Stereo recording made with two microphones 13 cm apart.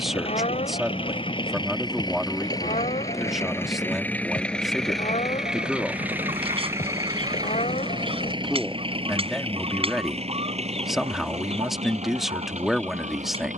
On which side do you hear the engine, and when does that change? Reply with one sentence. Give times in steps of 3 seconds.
You can hear the engine on the left from 0 s, in the centre from 3 s and on the right from 6 s.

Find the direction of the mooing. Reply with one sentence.
You can hear the mooing on the left.